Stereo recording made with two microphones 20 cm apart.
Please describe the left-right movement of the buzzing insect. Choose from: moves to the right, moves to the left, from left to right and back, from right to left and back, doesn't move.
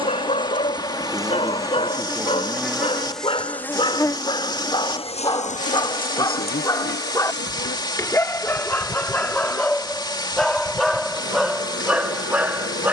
moves to the left.